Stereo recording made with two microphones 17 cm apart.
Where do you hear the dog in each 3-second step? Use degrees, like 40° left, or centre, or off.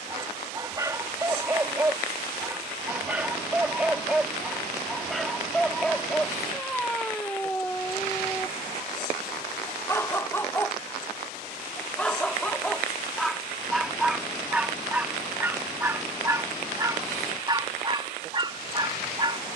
20° right, centre, 10° left, 10° left, centre, 20° right, 30° right.